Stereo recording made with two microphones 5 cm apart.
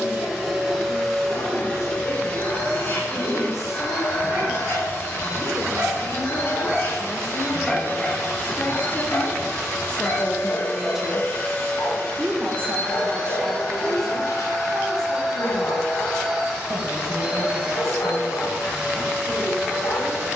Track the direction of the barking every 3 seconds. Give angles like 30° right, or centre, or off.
50° right, 40° right, centre, 60° left, 80° left, 80° left, 80° left.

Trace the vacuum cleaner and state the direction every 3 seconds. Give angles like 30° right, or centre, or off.
10° left, 40° left, 40° left, 30° left, 10° left, 10° right, 20° right.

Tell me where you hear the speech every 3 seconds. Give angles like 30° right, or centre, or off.
70° left, 60° left, 50° left, 10° left, 50° right, 70° right, 70° right.